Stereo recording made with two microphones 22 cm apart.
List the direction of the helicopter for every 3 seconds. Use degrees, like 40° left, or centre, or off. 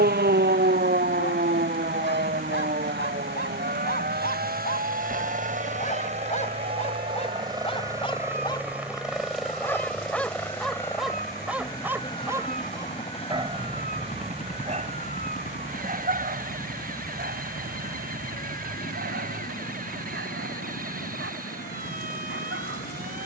60° right, 40° right, 20° right, 10° left, 30° left, 40° left, 50° left, 50° left.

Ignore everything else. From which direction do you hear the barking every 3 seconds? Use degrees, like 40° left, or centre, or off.
50° left, 40° left, 30° left, centre, 20° right, 40° right, 60° right, 60° right.